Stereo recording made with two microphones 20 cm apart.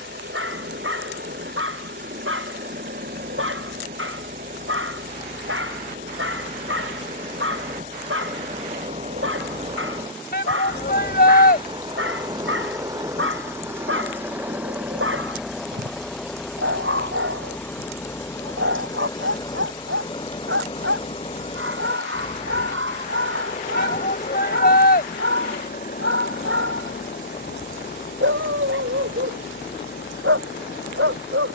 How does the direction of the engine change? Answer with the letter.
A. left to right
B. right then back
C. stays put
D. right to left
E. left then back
D.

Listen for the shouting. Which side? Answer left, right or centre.
left.